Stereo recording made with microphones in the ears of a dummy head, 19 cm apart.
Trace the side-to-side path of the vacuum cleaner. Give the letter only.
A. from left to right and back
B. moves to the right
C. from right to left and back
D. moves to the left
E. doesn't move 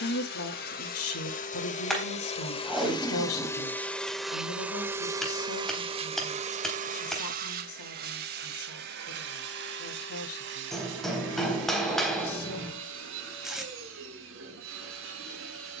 B.